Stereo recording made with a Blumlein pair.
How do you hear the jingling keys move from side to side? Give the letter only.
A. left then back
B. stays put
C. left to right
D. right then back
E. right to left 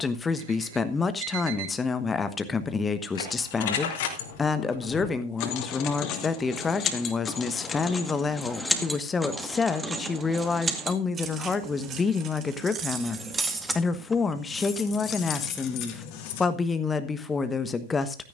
D.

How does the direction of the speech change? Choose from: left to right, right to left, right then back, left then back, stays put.
stays put.